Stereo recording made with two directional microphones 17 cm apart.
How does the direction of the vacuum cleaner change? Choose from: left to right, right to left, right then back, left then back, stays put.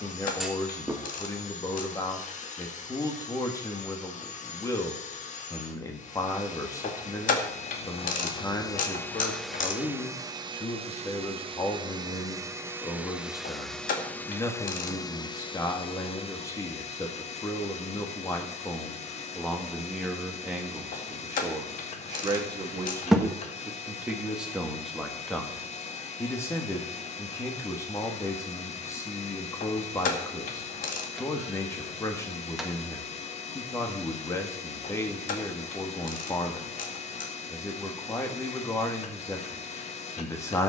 right then back.